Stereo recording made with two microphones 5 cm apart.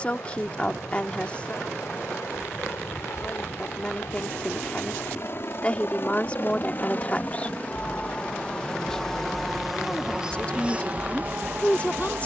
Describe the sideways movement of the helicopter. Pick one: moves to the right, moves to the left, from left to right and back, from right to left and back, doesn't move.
moves to the right.